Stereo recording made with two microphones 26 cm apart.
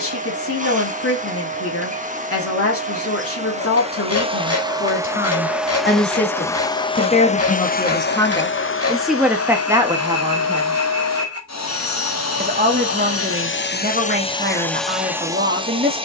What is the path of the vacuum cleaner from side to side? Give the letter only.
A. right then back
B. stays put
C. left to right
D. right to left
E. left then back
E.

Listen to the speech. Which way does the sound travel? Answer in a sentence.
You can hear the speech go from the left side to the right.